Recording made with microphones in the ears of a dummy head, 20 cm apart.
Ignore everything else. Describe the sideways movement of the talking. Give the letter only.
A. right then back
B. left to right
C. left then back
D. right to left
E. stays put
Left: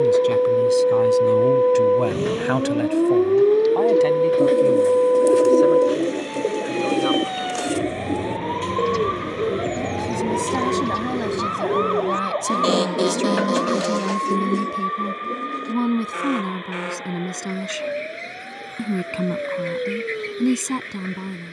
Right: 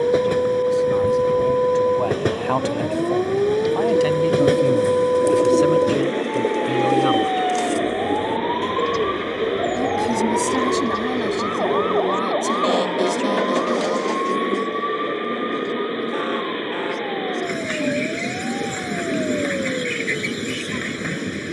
A.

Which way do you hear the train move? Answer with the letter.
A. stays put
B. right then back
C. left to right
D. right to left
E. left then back
A.